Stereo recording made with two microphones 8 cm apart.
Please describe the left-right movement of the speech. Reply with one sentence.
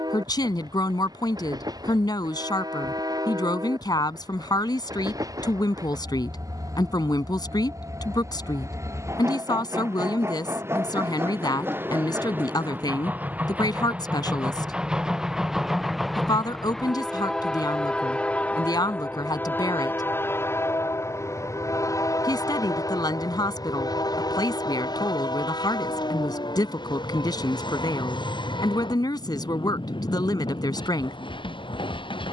In this clip you hear the speech stay put.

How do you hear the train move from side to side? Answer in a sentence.
In this clip you hear the train move from right to left.